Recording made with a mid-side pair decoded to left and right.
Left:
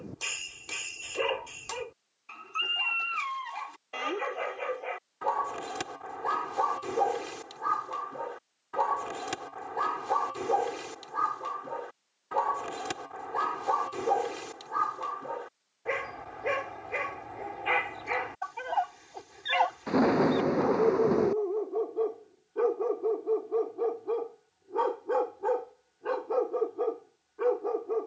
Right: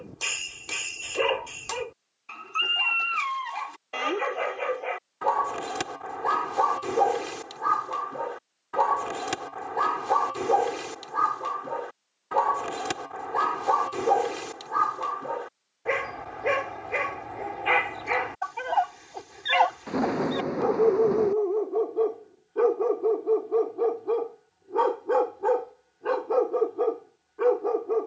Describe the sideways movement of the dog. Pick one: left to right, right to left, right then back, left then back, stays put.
stays put.